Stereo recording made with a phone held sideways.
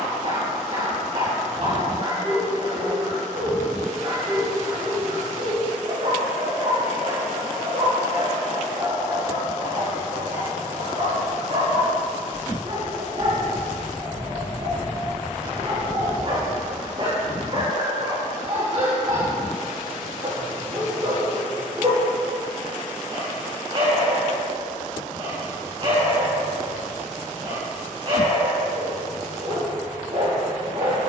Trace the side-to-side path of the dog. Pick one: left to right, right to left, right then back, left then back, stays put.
stays put.